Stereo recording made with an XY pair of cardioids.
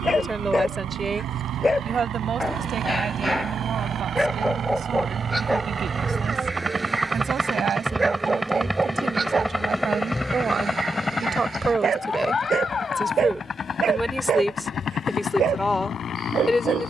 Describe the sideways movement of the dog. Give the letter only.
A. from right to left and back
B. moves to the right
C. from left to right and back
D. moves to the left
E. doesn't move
B.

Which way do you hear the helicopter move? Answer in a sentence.
In this clip you hear the helicopter travel towards the left.